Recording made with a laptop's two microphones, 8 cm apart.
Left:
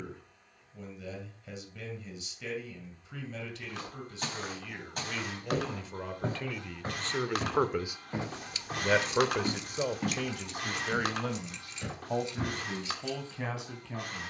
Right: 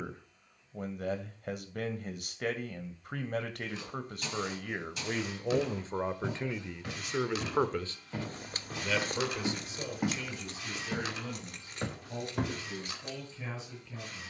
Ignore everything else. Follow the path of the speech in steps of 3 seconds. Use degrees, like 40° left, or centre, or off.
50° right, 50° right, 10° right, 60° left, 70° left.